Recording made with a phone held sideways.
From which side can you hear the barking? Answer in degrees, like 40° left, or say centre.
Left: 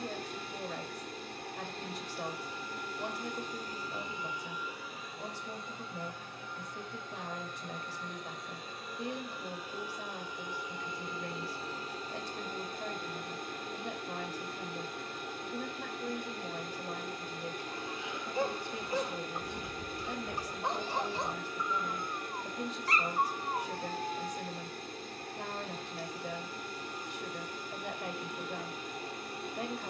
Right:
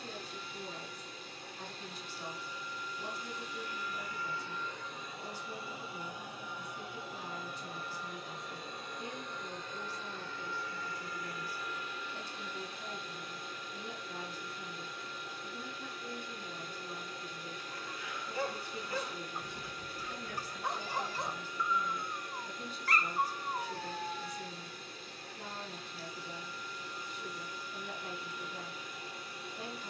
20° left.